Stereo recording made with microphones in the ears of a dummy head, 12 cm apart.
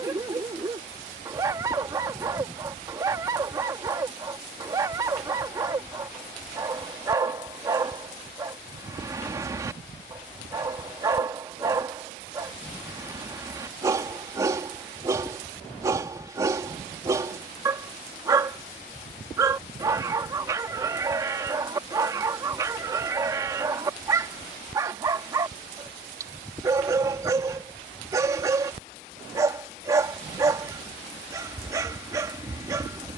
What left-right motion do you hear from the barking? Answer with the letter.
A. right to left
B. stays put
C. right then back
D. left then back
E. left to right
B.